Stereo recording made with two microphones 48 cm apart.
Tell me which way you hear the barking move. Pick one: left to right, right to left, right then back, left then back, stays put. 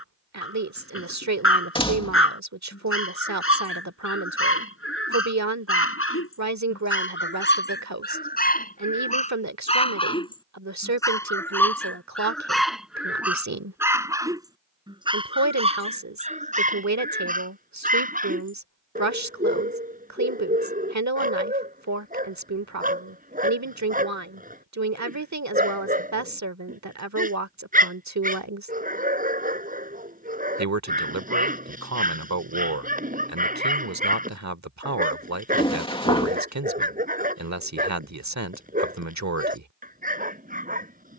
left to right.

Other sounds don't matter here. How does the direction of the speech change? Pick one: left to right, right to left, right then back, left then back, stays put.
stays put.